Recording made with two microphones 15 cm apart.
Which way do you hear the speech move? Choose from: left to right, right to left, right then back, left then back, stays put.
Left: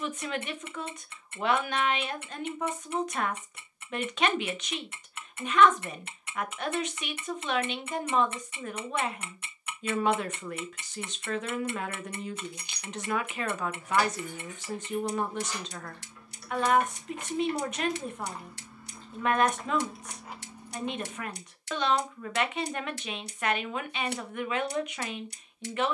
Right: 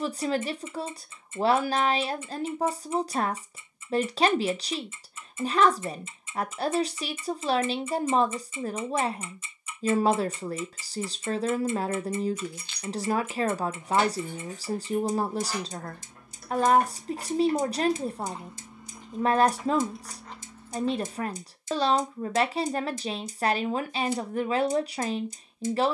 stays put.